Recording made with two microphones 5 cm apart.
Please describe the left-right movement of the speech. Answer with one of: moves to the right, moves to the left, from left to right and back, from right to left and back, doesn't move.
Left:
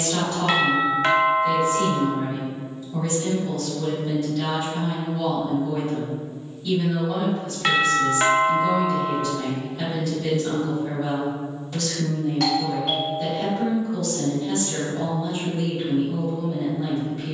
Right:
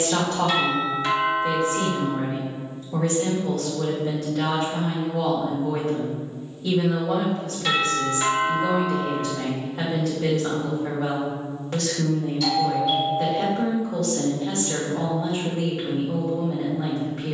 doesn't move.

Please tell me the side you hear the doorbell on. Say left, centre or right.
left.